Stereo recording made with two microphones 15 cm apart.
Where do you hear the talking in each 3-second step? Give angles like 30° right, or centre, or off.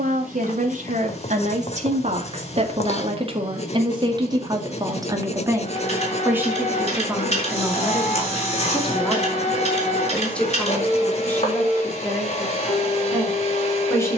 50° right, 30° right, 10° right, 10° left, 20° left.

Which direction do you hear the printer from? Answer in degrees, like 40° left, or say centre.
40° left.